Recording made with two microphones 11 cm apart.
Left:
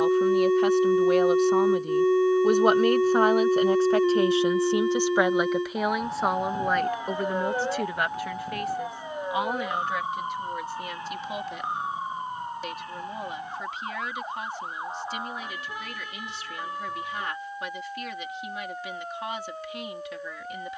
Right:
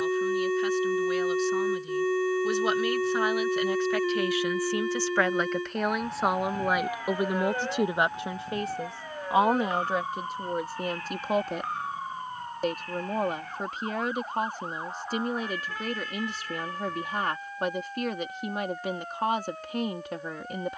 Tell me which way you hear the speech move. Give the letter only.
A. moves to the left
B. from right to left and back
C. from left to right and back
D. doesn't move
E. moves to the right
E.